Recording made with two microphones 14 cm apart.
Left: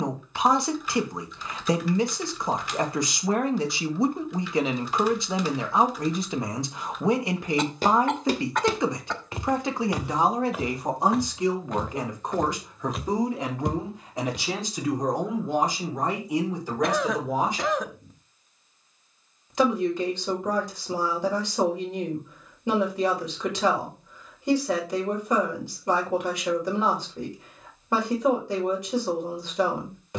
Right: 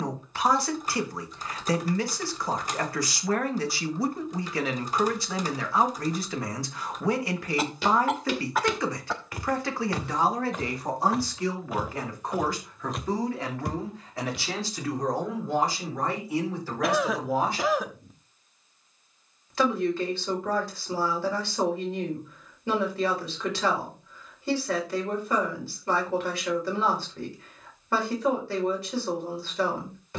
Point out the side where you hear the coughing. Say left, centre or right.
centre.